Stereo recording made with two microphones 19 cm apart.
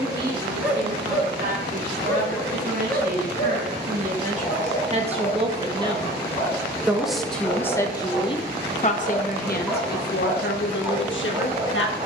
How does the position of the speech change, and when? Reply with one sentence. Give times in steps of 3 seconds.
In this clip you hear the speech on the right from 0 s, in the centre from 6 s and on the left from 9 s.